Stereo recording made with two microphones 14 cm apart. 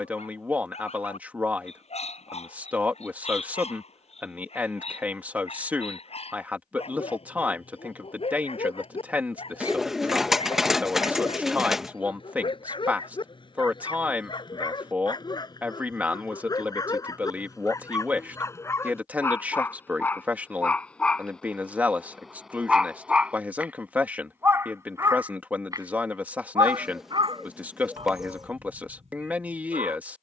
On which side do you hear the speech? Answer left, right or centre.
centre.